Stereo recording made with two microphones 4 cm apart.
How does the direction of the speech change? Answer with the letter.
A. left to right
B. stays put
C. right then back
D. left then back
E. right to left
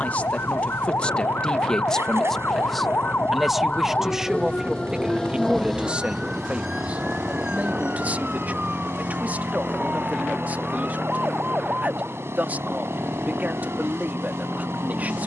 A.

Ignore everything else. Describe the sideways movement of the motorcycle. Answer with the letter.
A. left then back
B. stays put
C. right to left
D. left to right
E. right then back
B.